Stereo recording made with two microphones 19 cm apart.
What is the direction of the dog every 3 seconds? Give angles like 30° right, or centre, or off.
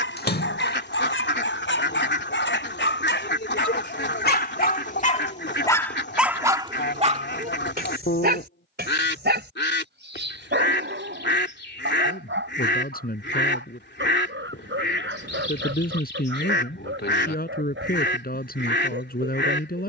80° left, 50° left, 40° right, 70° right, 80° right, 80° right, 80° right.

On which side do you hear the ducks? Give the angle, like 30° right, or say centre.
60° left.